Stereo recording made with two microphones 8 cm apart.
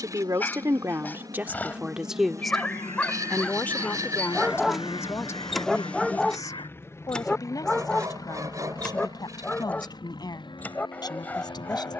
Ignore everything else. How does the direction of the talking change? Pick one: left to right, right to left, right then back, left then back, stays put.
right to left.